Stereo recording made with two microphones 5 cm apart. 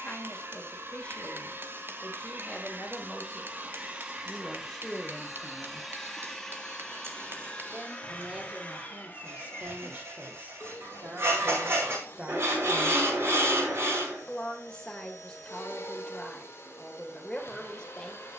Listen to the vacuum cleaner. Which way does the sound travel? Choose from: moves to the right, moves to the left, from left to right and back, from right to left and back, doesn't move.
moves to the left.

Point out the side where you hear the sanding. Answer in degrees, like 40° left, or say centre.
60° right.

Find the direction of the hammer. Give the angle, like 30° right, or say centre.
50° right.